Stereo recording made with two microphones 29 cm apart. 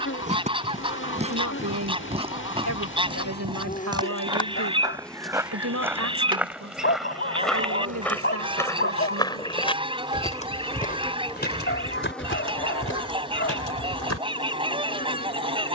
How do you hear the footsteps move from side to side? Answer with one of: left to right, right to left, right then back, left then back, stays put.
right to left.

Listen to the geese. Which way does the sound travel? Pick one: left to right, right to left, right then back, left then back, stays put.
stays put.